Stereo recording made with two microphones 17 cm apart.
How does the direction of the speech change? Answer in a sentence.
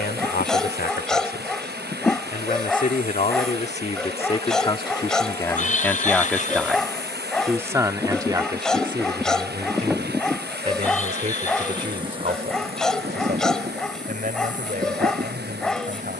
You can hear the speech travel towards the right.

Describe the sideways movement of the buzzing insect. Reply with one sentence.
You can hear the buzzing insect go left and come back.